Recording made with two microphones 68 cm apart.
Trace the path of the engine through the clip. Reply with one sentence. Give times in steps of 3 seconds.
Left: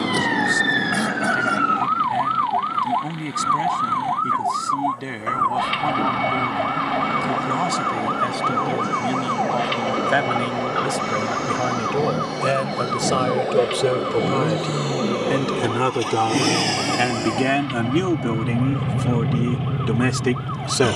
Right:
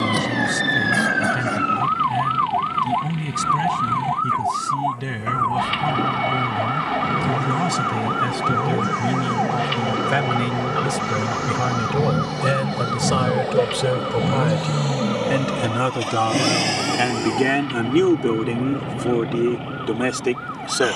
In this clip you hear the engine on the right from 0 s, in the centre from 15 s and on the left from 18 s.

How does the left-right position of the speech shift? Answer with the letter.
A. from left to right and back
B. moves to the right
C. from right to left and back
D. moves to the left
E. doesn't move
D.